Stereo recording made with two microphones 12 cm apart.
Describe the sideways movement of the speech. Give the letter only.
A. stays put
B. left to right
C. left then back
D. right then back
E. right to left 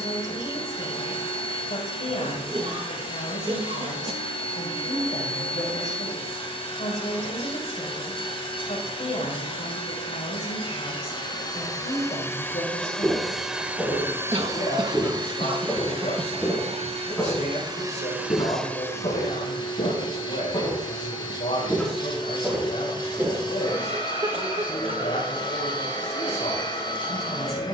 A.